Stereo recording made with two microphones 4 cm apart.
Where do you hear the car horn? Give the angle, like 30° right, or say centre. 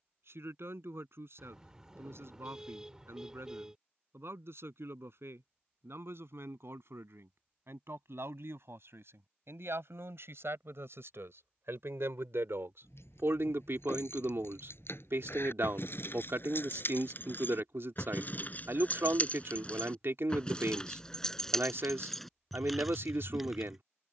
10° right.